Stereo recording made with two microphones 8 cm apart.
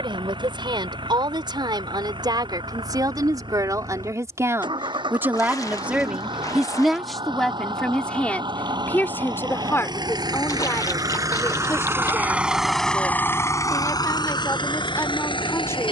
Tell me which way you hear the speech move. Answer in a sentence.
You can hear the speech travel towards the left.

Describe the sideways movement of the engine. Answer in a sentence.
In this clip you hear the engine move from right to left.